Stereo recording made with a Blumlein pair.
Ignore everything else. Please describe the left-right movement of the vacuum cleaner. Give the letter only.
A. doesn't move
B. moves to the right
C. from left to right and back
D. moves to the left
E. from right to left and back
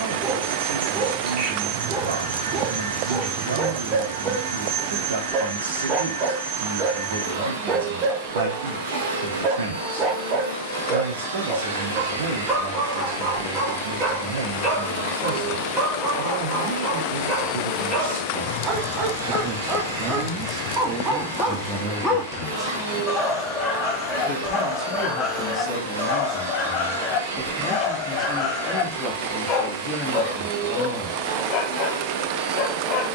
A.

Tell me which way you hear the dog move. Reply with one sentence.
In this clip you hear the dog go from the right side to the left.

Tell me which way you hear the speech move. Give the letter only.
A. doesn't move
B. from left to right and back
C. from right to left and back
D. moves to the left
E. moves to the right
D.